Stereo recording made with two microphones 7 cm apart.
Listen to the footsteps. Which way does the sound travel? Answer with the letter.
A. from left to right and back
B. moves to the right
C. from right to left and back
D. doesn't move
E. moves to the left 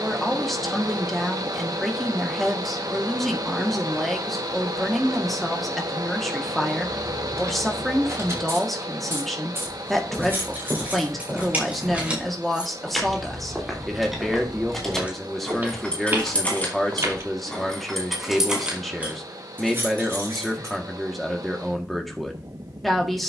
B.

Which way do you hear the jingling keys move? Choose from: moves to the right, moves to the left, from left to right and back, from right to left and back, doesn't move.
from right to left and back.